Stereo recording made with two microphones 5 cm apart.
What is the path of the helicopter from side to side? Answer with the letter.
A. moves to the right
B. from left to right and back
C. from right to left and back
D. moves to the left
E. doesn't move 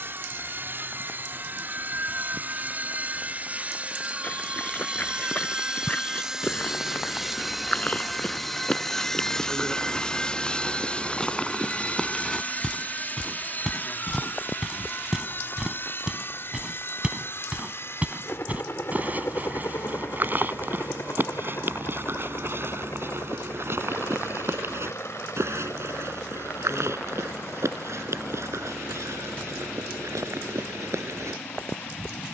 D.